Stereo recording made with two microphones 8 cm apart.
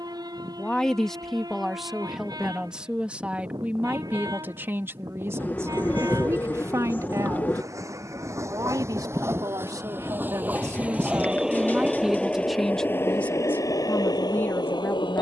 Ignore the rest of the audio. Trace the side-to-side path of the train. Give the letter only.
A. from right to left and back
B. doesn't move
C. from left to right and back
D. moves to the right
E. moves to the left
E.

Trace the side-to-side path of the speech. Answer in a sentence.
You can hear the speech move from left to right and back again.